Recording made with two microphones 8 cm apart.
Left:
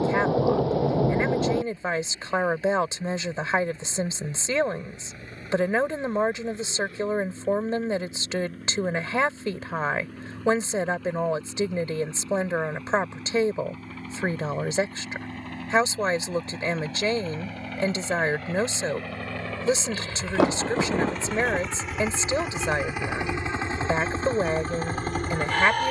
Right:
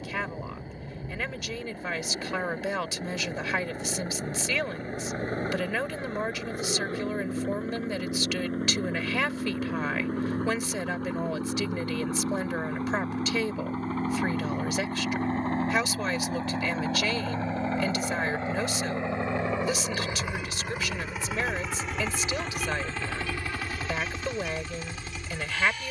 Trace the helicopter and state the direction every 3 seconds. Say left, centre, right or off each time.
right, right, right, right, right, right, right, centre, left.